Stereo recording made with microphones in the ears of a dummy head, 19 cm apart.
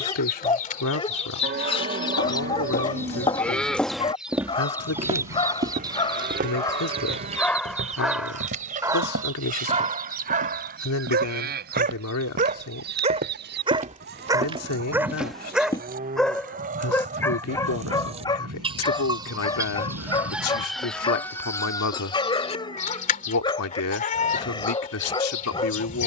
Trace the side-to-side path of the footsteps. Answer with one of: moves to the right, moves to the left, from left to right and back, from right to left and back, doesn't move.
from left to right and back.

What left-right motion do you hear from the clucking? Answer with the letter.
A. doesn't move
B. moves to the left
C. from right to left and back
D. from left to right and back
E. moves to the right
D.